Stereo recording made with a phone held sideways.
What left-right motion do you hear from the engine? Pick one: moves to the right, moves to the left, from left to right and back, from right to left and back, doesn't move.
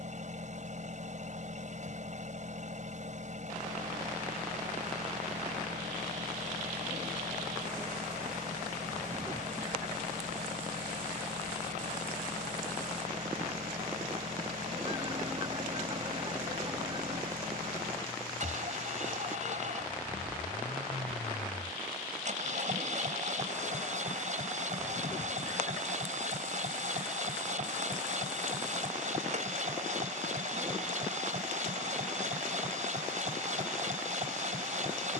doesn't move.